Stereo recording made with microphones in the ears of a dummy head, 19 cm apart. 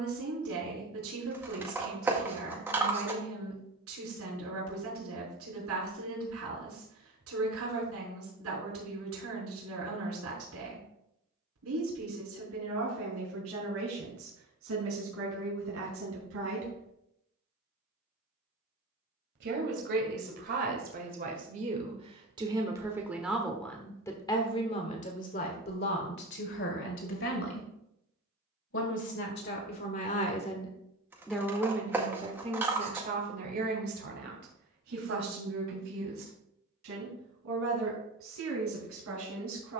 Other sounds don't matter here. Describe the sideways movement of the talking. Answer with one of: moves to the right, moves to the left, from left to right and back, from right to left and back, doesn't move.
from right to left and back.